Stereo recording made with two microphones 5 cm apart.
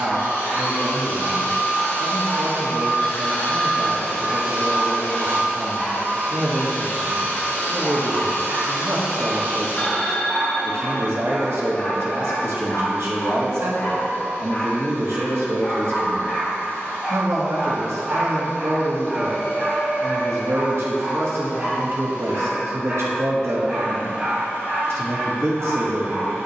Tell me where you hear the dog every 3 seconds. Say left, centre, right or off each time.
right, right, right, centre, left, centre, right, right, right.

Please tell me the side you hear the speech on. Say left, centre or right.
right.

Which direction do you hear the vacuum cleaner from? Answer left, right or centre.
left.